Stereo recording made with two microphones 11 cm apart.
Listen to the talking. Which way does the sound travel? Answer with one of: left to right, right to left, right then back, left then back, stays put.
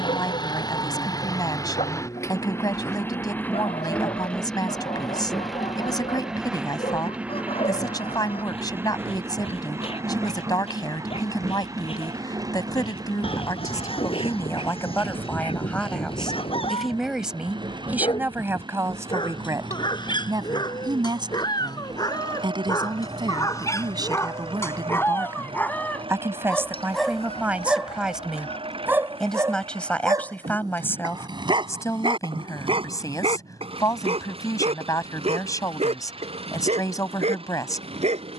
right then back.